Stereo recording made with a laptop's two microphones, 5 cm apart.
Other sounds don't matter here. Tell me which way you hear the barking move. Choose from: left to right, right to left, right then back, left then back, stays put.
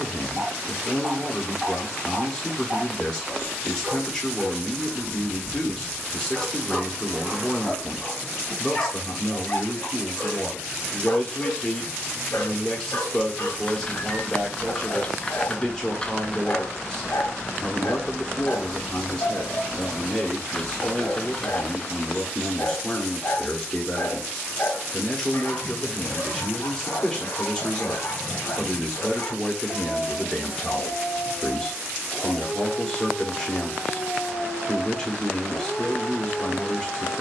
right to left.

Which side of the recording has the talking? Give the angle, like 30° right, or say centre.
10° left.